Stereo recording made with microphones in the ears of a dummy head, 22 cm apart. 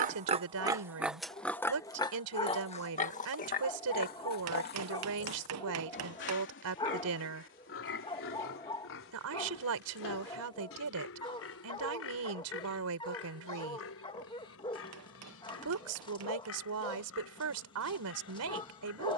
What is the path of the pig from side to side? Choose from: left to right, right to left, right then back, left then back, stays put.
right to left.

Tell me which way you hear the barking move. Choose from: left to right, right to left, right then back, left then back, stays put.
stays put.